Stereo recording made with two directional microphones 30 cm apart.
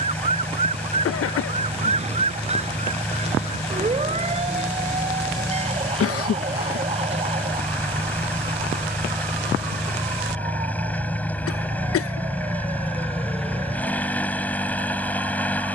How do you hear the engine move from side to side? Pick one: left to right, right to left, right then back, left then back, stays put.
stays put.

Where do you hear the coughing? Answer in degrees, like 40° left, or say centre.
50° left.